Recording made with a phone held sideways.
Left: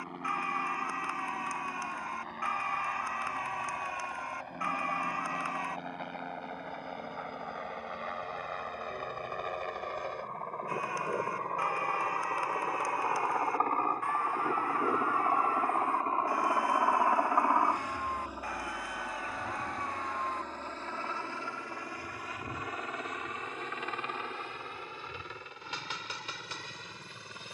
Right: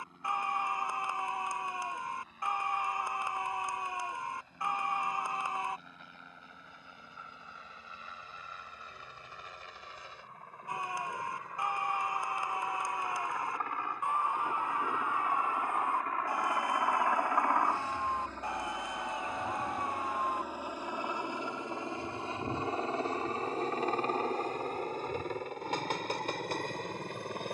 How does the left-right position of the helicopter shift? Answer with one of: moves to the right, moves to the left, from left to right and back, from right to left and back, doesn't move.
moves to the right.